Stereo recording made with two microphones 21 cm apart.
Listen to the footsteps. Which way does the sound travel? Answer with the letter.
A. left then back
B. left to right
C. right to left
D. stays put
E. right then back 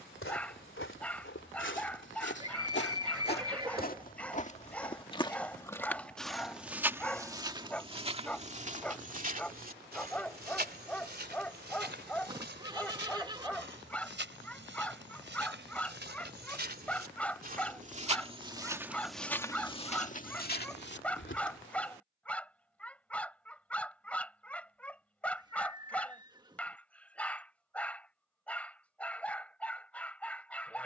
E.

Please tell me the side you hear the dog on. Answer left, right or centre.
centre.